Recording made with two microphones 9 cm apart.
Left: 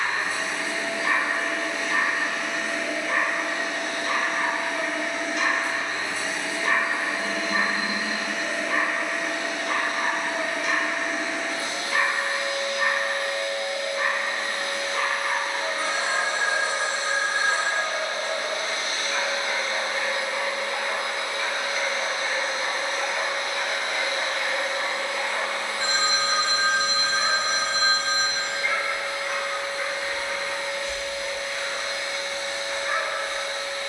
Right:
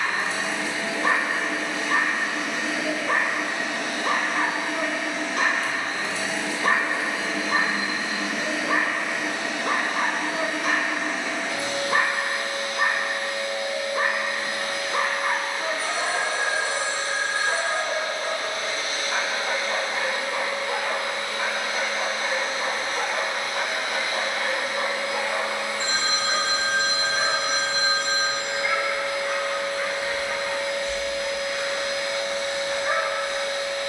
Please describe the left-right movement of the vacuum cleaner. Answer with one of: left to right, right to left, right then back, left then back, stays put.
left then back.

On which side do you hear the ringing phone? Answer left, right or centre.
left.